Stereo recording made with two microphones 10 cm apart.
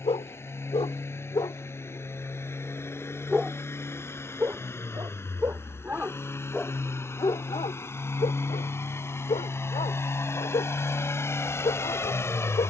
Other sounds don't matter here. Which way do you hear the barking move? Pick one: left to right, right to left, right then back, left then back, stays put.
right then back.